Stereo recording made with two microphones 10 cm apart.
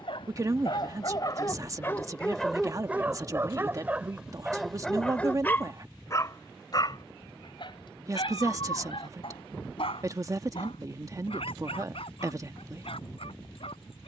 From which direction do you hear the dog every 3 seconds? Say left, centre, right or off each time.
left, centre, left, left, left.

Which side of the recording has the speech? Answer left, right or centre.
right.